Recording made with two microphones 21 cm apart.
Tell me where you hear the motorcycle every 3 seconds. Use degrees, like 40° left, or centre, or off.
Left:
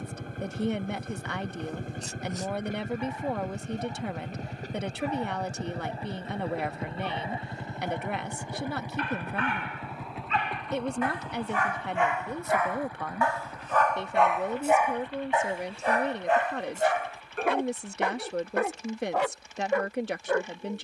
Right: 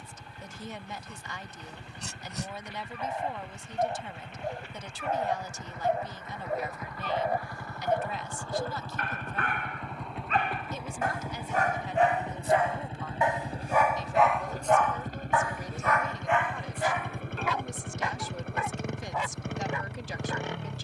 50° left, 40° left, 20° left, centre, 30° right, 50° right, 60° right.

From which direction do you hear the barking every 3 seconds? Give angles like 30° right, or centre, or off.
70° right, 70° right, 60° right, 50° right, 10° right, 40° left, 70° left.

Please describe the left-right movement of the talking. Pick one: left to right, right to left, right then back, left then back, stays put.
stays put.